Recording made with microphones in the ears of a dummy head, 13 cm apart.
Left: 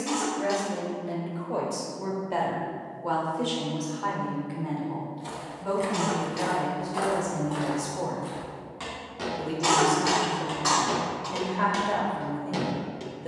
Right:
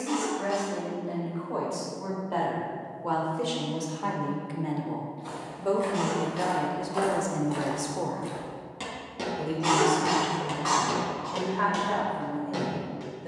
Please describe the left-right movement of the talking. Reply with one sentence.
In this clip you hear the talking move from left to right and back again.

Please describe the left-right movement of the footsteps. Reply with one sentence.
You can hear the footsteps move from left to right and back again.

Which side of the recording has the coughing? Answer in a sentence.
In this clip you hear the coughing on the left.